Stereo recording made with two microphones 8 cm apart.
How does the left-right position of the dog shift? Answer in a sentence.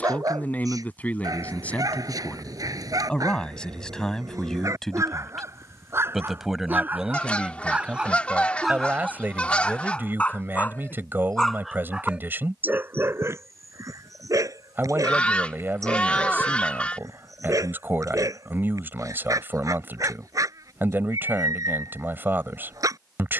In this clip you hear the dog move from right to left and back again.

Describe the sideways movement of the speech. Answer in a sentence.
You can hear the speech go from the left side to the right.